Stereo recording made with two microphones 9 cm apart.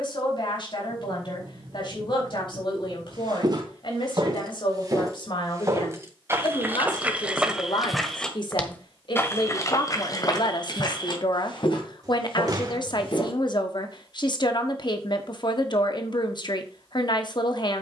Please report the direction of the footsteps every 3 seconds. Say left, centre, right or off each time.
off, right, centre, left, left, off.